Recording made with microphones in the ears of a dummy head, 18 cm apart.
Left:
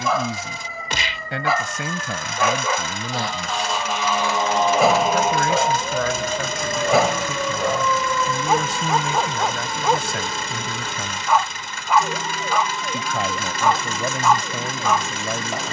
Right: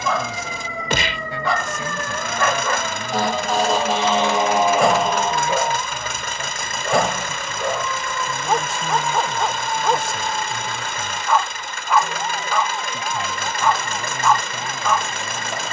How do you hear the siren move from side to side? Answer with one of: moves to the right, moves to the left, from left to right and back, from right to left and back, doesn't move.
moves to the left.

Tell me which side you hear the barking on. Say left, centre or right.
centre.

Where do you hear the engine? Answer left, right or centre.
right.